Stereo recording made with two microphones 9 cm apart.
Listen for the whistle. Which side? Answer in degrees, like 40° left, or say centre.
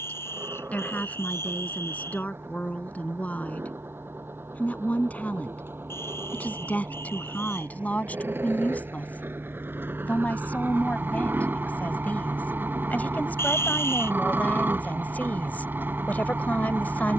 30° left.